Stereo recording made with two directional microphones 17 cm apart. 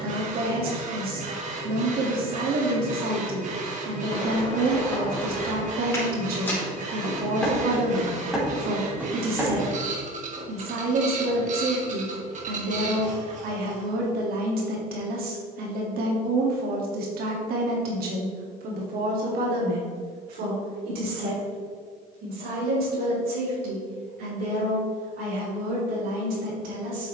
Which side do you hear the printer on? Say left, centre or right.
right.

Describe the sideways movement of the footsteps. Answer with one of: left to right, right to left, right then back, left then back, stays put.
left to right.